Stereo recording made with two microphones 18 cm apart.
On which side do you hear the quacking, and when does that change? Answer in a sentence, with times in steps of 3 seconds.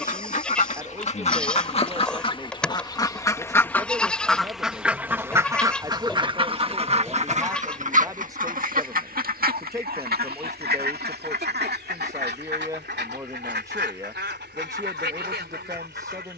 In this clip you hear the quacking on the left from 0 s, in the centre from 3 s and on the right from 6 s.